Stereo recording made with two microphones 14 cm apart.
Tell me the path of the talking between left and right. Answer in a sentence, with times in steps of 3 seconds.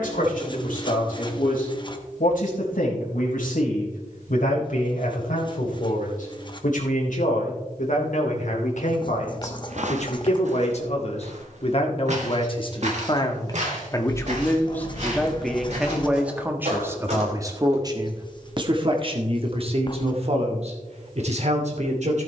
In this clip you hear the talking on the left from 0 s, in the centre from 15 s and on the right from 18 s.